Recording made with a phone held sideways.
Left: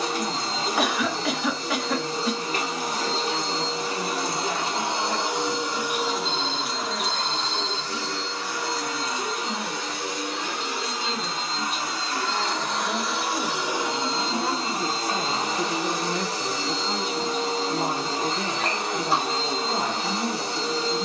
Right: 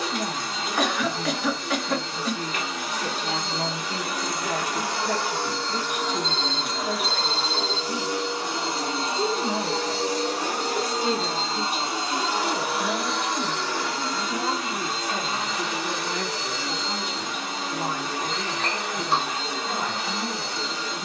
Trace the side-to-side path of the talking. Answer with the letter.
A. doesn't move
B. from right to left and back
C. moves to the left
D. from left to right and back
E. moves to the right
C.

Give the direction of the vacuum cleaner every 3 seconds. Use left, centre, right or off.
left, left, centre, right, centre, left, left.